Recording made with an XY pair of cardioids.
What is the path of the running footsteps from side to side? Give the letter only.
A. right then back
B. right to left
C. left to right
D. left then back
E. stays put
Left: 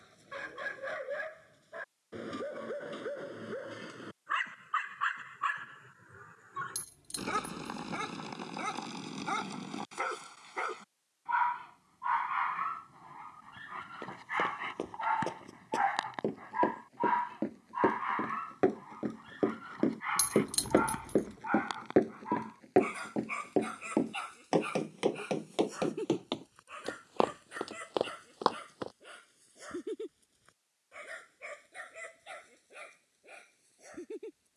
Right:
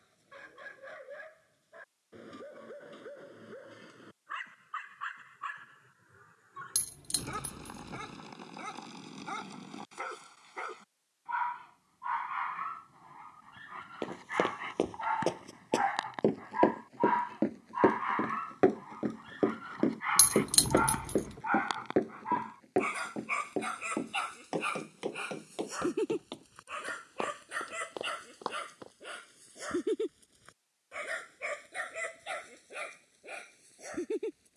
B.